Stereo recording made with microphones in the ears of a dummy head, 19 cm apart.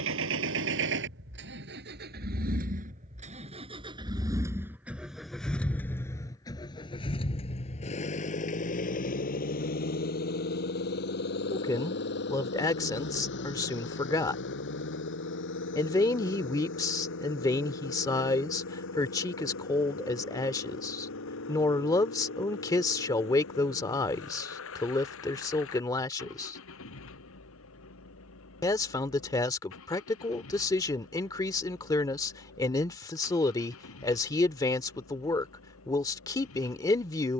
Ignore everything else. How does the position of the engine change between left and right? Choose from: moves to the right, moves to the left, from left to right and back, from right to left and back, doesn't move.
moves to the left.